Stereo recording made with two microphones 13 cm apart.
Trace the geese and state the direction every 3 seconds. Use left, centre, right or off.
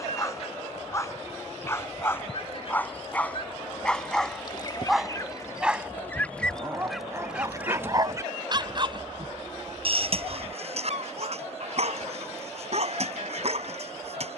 left, left, centre, right, right.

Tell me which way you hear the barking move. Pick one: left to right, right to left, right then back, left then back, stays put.
left to right.